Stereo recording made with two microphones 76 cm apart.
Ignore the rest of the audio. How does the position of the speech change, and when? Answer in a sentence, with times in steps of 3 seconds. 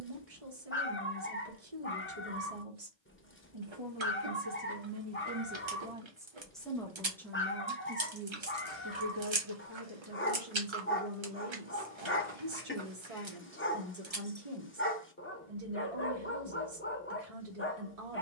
You can hear the speech on the right from 0 s, in the centre from 6 s and on the right from 9 s.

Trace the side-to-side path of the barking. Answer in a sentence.
You can hear the barking stay in one place.